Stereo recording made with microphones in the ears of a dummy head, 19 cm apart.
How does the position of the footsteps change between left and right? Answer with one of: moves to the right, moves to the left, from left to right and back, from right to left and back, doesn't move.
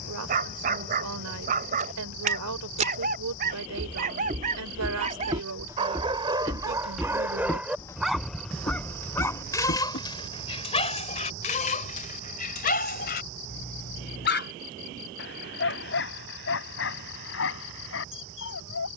moves to the left.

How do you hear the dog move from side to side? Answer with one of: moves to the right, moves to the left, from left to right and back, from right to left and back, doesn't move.
moves to the left.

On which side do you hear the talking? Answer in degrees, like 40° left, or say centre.
80° right.